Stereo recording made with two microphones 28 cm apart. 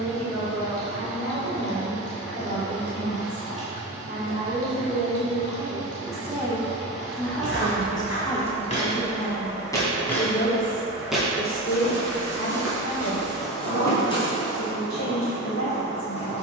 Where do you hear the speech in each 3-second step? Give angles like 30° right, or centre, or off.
50° right, 30° right, 10° left, 40° left, 60° left, 70° left.